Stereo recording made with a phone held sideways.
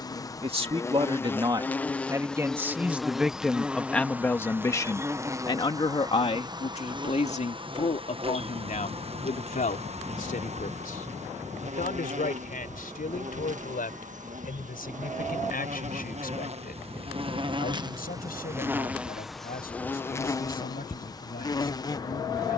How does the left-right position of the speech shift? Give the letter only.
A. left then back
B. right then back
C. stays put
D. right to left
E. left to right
D.